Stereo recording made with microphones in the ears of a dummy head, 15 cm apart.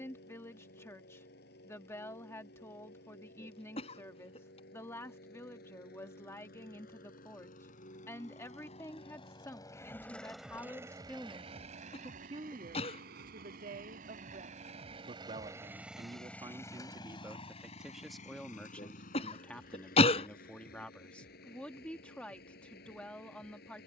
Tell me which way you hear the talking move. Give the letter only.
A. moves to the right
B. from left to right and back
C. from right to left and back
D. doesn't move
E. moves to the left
B.